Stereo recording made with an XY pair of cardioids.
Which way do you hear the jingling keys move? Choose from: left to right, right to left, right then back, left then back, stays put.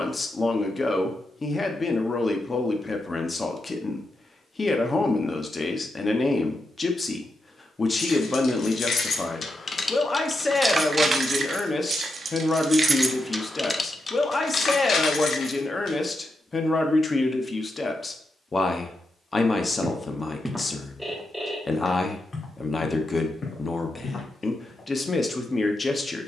right then back.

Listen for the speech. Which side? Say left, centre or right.
left.